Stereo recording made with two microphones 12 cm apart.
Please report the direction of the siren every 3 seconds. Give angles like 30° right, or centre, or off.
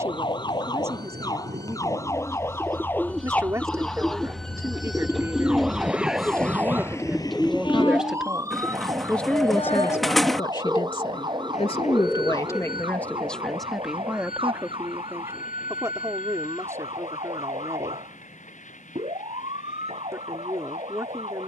30° left, centre, 20° right, 30° right, 40° right, 50° right, 50° right.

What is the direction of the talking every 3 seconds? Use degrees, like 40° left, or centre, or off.
20° right, 20° right, 10° right, 30° left, 10° left, 20° right, 20° right.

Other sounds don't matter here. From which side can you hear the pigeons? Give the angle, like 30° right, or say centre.
centre.